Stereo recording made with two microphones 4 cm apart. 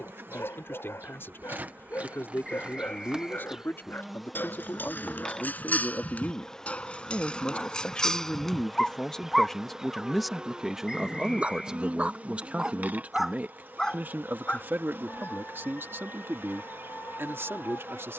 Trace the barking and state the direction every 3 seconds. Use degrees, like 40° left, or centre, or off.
60° left, 50° left, 20° left, 20° right, centre, 60° left.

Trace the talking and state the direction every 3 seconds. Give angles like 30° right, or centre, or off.
60° left, 50° left, 30° left, 10° right, 40° right, 60° right.